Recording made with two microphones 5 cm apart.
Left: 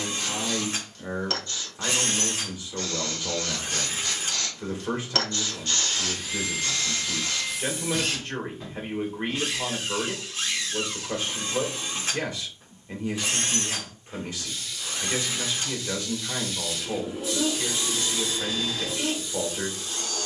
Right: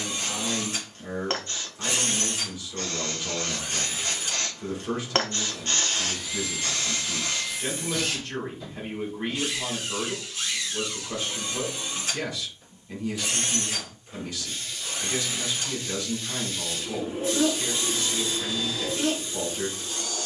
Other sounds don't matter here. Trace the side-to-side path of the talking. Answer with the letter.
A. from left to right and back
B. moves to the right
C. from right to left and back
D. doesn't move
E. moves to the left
D.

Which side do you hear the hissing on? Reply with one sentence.
You can hear the hissing on the right.